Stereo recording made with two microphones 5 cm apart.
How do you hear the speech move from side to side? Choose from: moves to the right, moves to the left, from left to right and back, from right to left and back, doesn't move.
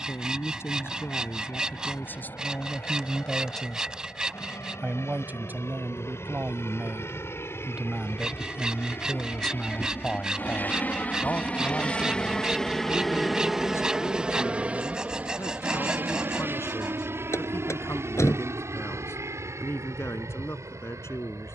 from left to right and back.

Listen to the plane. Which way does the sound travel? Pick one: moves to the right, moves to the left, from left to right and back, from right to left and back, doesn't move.
moves to the right.